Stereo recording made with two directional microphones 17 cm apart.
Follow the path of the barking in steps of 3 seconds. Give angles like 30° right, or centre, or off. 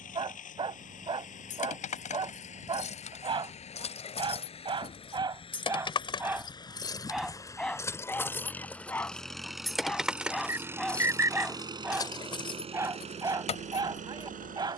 30° right, 30° right, centre, centre, 20° right.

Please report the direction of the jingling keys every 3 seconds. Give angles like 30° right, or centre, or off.
40° left, 40° left, 20° left, 10° left, 40° left.